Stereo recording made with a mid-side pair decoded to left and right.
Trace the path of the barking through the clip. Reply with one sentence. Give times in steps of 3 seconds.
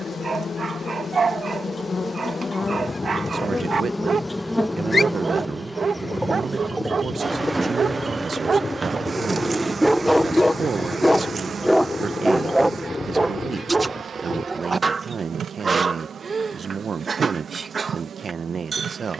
You can hear the barking on the right from 0 s, in the centre from 9 s and on the right from 12 s.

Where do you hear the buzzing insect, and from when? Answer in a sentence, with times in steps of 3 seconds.
You can hear the buzzing insect on the left from 0 s, in the centre from 3 s and on the right from 6 s.